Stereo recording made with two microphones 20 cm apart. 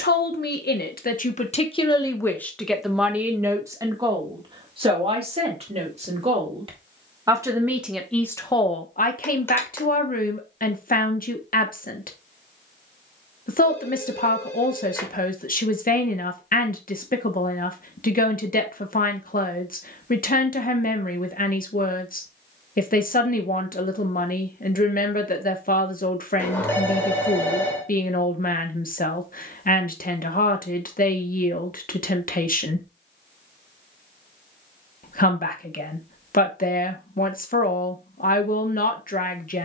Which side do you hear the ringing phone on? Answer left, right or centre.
centre.